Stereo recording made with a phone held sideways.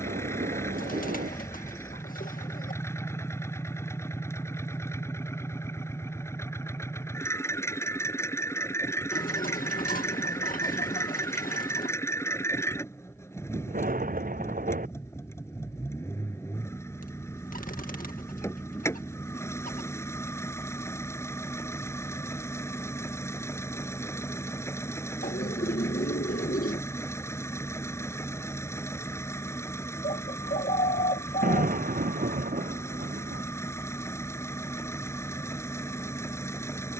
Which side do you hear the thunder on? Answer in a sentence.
In this clip you hear the thunder on the right.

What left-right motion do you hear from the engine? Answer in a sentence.
In this clip you hear the engine stay in one place.